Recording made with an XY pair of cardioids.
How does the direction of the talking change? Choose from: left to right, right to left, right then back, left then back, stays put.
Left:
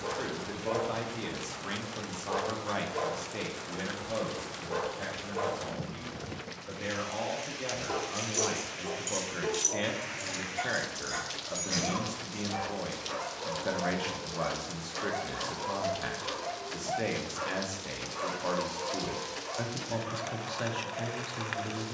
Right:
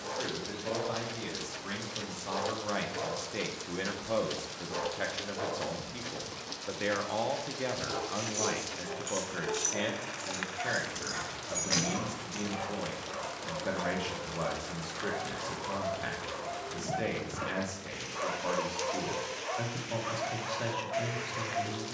right then back.